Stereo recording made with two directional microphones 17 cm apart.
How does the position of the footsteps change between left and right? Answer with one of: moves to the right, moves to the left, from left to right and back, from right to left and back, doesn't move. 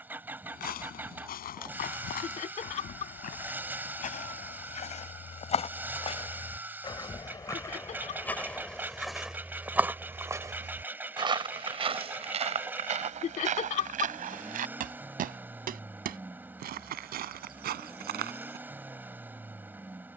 moves to the right.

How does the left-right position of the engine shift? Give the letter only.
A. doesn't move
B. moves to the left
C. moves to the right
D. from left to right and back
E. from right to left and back
A.